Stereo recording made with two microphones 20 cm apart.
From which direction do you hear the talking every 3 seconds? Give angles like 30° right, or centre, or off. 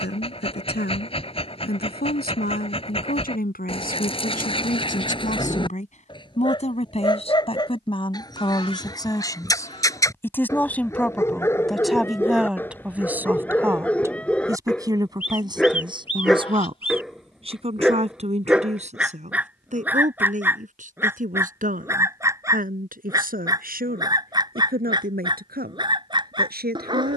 60° left, 50° left, 30° left, 10° left, 10° right, 30° right, 40° right, 50° right, 50° right.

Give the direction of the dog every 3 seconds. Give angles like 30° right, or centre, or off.
30° left, 30° left, 20° left, 20° left, 10° left, centre, 10° right, 20° right, 20° right.